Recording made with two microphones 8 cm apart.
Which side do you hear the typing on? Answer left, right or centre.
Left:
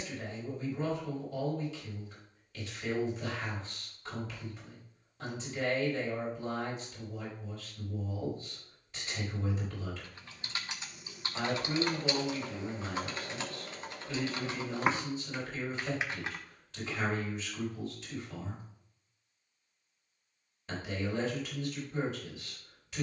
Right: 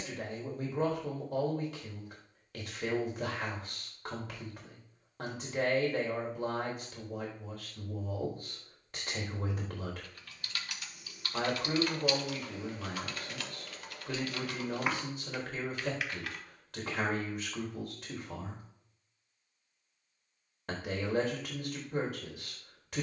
left.